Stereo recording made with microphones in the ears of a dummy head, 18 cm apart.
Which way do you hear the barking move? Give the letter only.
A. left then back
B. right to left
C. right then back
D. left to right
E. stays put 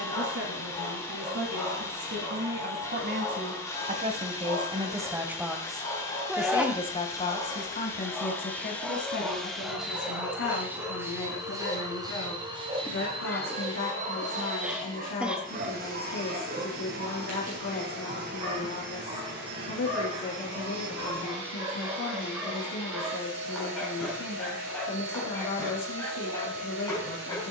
C.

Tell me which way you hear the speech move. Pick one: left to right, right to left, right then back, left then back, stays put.
right to left.